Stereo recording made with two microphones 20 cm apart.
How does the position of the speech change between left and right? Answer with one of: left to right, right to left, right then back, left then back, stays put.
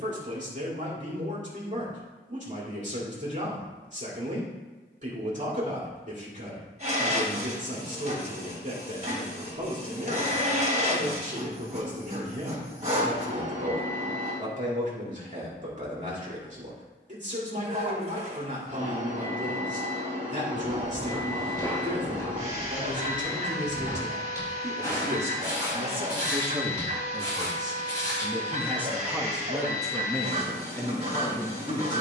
right to left.